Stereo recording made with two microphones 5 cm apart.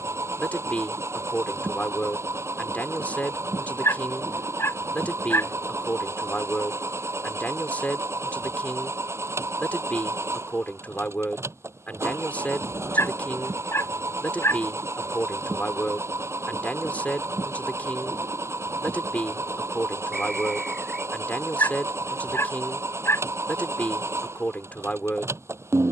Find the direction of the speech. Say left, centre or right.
left.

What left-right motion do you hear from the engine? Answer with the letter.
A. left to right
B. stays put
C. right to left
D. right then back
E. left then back
B.